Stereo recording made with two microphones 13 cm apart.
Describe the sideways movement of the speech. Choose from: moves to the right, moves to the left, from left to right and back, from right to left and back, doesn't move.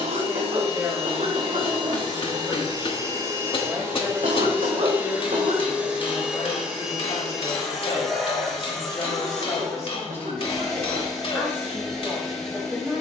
from right to left and back.